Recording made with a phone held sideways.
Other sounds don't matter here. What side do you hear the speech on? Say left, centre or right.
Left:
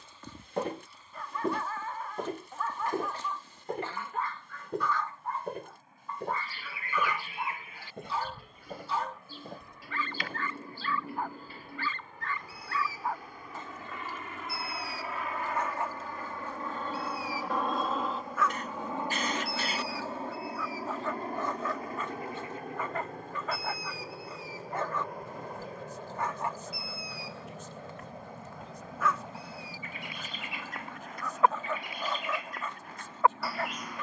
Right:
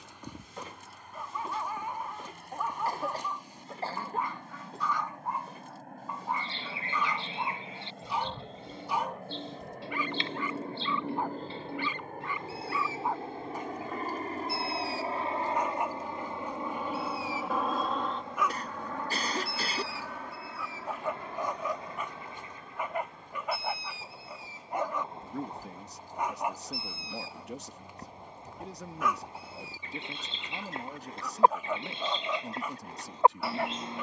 right.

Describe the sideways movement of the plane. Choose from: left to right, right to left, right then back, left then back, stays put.
right to left.